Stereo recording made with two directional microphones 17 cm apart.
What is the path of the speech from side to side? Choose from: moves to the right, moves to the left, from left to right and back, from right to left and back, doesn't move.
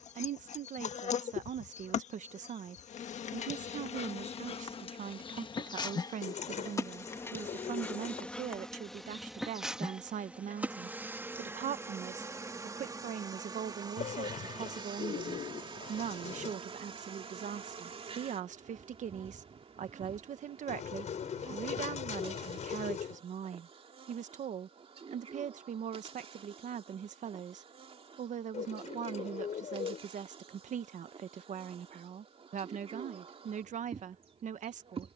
doesn't move.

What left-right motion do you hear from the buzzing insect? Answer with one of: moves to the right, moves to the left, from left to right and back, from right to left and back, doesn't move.
moves to the right.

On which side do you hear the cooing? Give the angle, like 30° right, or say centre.
40° left.